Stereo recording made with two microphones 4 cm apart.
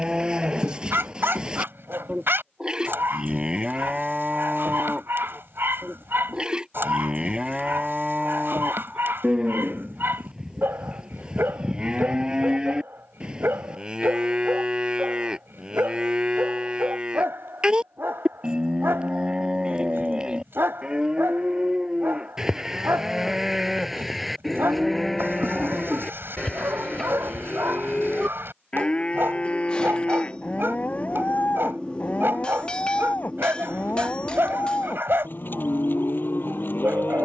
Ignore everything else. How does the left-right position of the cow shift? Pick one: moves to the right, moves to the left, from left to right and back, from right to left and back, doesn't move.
moves to the left.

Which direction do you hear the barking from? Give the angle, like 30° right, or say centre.
60° right.